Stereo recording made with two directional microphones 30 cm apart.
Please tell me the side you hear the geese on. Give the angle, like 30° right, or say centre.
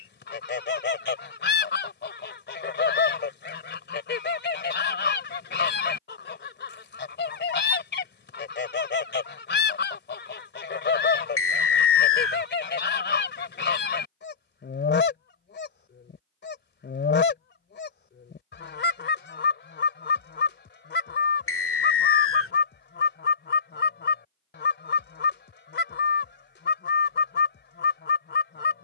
40° left.